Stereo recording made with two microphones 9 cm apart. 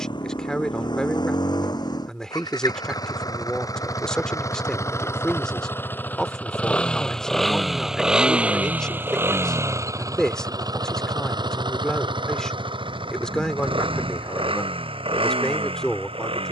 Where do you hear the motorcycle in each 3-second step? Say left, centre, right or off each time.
left, left, centre, right, right, right.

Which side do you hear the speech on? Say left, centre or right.
centre.